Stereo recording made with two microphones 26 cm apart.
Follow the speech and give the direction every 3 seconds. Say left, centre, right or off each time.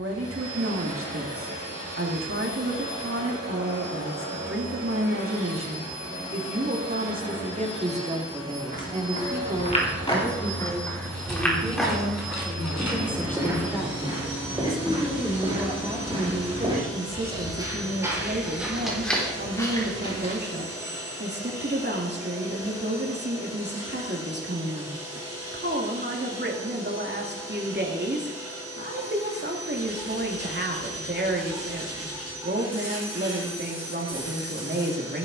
right, right, right, centre, centre, right, right, right, right, right, right, right.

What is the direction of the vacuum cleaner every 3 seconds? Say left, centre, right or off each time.
left, left, left, centre, centre, centre, centre, centre, centre, centre, centre, centre.